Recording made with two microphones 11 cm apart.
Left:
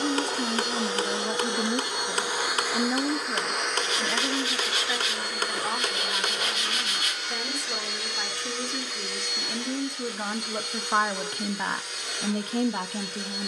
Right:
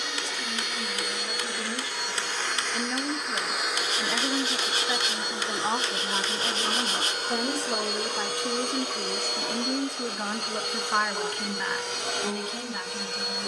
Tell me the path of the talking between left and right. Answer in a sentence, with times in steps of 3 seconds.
You can hear the talking on the left from 0 s, in the centre from 3 s, on the right from 6 s, in the centre from 9 s and on the left from 12 s.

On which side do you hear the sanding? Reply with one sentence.
In this clip you hear the sanding on the right.